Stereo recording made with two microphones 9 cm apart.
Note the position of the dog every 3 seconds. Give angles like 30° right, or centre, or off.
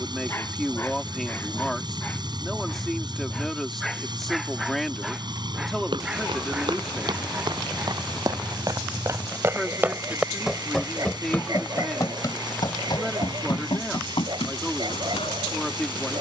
20° left, centre, 20° right, 30° right, 50° right, 50° right.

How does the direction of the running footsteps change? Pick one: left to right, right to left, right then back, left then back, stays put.
right to left.